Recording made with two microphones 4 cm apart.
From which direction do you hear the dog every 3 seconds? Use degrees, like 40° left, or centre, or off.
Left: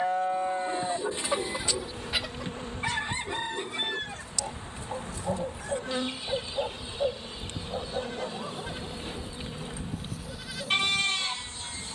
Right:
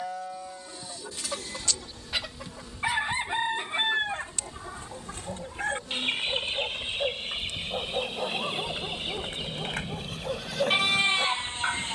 50° left, 30° left, centre, 50° right.